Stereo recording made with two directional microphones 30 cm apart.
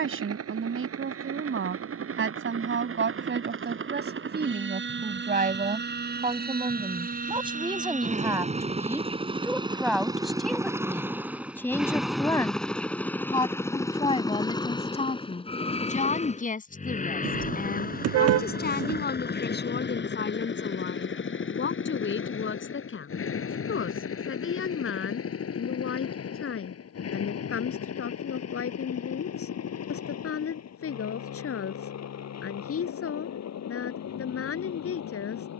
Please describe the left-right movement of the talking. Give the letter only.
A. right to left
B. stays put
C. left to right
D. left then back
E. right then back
A.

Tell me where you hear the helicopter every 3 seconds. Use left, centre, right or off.
right, right, right, centre, centre, left, left, left, left, left, left, left.